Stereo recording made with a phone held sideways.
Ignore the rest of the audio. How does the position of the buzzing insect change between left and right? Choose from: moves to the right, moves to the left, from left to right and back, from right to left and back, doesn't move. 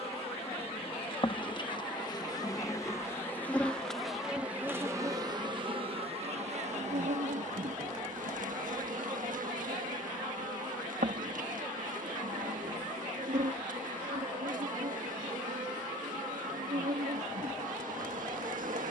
moves to the right.